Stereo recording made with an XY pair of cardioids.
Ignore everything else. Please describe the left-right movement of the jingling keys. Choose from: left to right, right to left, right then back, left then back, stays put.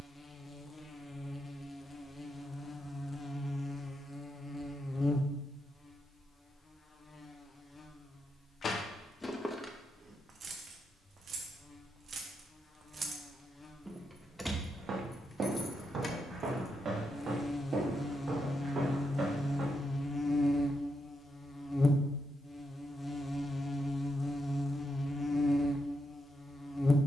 right then back.